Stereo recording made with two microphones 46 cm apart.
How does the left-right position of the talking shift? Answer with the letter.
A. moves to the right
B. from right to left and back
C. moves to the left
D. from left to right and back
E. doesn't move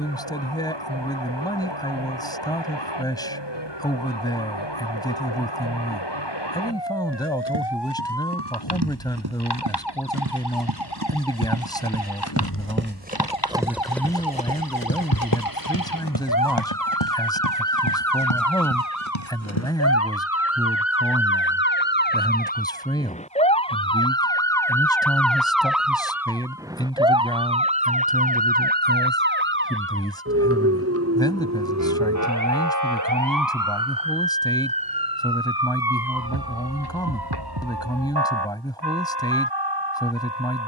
E.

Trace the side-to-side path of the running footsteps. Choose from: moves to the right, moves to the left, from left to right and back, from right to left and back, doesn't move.
moves to the left.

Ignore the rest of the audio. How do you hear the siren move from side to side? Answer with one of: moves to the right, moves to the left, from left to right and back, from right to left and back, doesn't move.
moves to the right.